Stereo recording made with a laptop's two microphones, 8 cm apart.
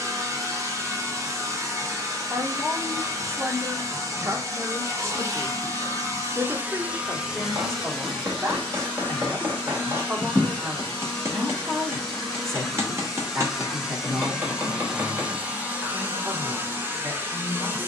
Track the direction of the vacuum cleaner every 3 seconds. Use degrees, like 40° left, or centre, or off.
40° right, 40° right, 10° right, 10° left, centre, 20° right.